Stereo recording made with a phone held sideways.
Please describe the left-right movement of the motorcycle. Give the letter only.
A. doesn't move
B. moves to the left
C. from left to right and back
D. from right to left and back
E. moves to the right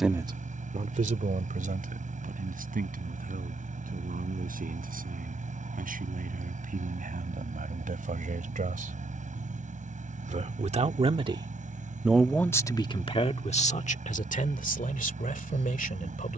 A.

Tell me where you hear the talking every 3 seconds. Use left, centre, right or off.
right, right, right, right, left, left.